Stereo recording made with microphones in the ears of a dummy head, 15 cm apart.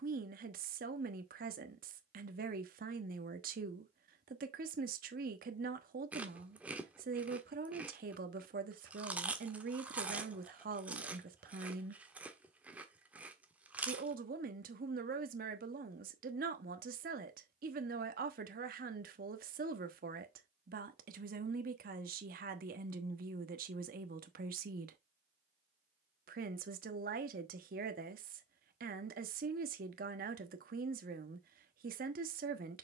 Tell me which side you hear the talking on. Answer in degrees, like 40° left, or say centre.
60° right.